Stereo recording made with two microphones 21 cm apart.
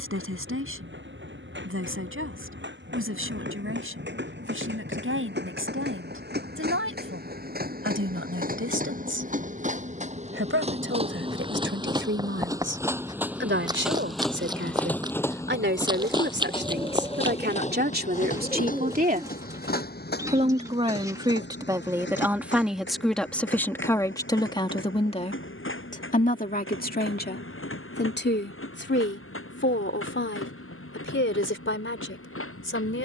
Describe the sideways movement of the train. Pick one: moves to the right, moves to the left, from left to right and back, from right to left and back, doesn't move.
moves to the left.